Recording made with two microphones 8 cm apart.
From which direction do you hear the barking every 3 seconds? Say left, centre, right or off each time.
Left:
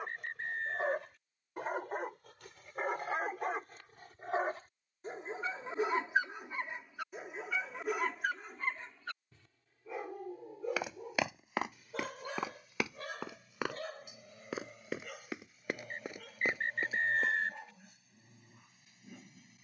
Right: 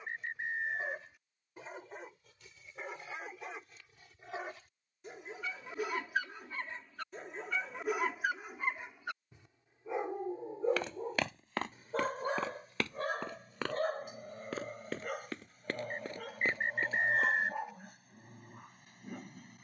left, left, centre, right, right, right, right.